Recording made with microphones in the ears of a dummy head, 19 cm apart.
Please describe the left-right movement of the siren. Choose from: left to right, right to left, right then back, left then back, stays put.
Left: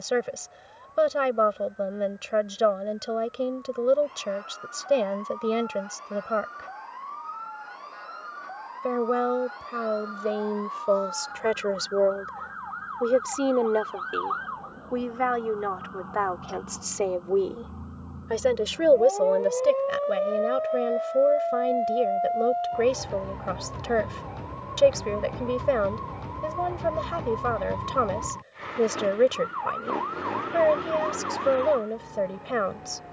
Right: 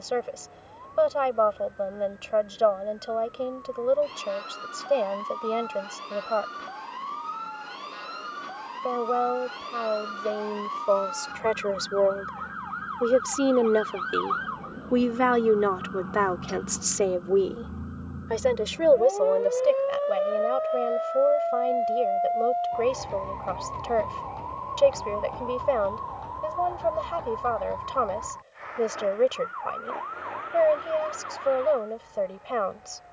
right to left.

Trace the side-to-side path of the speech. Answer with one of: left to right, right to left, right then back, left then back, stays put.
right then back.